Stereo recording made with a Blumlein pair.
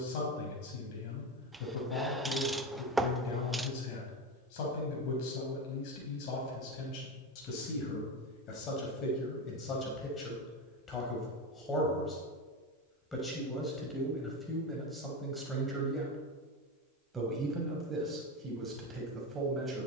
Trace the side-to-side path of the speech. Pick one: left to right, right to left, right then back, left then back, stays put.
left to right.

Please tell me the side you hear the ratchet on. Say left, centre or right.
centre.